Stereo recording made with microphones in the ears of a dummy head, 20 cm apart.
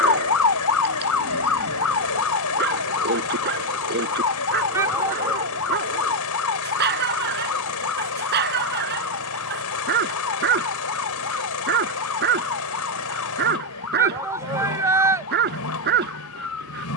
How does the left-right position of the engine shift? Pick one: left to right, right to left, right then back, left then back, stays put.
stays put.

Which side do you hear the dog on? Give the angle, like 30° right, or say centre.
50° right.